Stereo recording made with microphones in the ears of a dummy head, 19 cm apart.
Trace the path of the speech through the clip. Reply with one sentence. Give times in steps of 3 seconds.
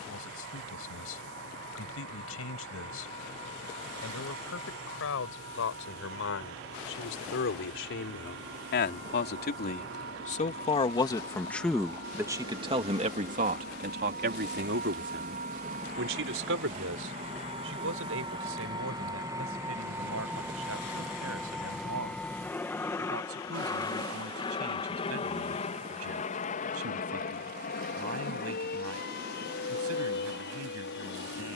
In this clip you hear the speech on the left from 0 s and on the right from 12 s.